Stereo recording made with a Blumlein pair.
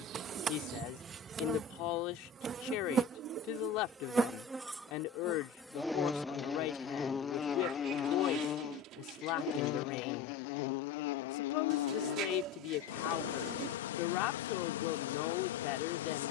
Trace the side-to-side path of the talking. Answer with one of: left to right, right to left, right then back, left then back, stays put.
stays put.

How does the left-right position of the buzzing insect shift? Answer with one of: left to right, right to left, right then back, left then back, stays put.
right to left.